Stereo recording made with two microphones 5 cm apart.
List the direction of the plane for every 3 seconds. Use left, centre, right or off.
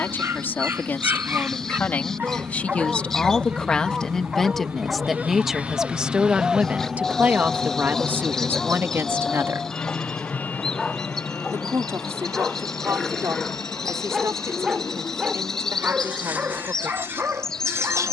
right, right, centre, left, left, left.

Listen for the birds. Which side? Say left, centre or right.
centre.